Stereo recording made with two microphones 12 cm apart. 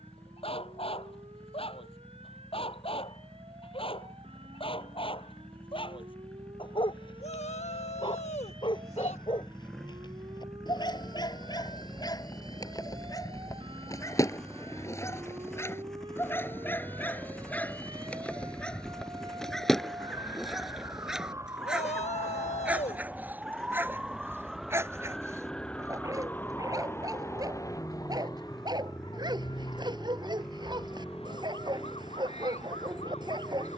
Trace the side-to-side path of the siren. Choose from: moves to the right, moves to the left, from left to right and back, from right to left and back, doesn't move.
moves to the left.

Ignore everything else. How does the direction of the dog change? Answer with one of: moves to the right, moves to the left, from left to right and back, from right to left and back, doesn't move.
moves to the right.